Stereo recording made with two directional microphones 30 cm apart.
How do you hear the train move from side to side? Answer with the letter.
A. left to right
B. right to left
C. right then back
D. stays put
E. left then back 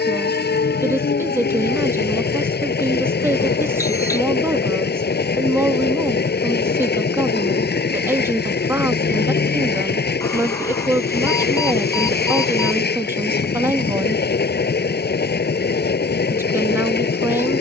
D.